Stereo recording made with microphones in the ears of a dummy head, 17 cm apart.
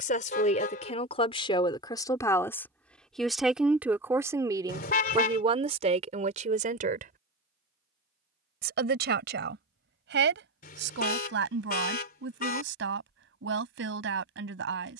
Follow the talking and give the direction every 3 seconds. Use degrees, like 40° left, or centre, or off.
30° left, 20° right, 40° right, 60° right, 70° right.